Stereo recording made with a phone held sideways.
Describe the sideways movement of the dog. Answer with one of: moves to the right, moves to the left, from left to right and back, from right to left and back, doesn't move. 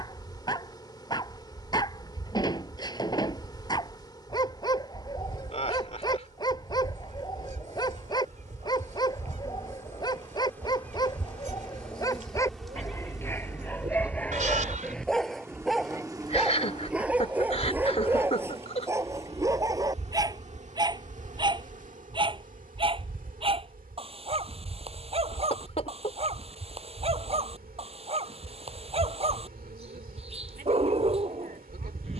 moves to the right.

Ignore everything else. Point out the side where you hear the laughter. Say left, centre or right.
left.